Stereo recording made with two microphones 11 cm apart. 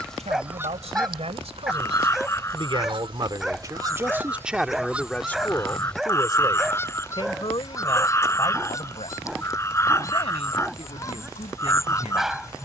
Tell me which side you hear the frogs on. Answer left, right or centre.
left.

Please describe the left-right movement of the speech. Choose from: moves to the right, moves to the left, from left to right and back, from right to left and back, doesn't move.
moves to the left.